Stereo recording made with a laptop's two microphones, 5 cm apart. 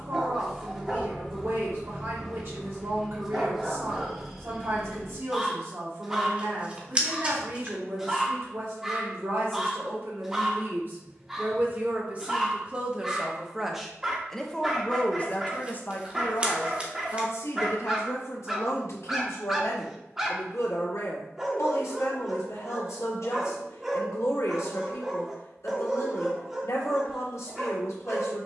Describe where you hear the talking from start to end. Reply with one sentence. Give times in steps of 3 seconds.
In this clip you hear the talking on the right from 0 s, in the centre from 12 s and on the left from 15 s.